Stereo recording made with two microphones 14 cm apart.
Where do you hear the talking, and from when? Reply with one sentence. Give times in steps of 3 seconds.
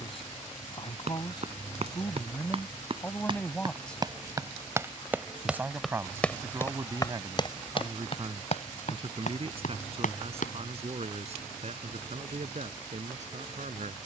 In this clip you hear the talking on the left from 0 s, in the centre from 3 s and on the right from 6 s.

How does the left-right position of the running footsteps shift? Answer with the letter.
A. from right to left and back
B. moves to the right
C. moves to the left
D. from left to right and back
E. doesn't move
C.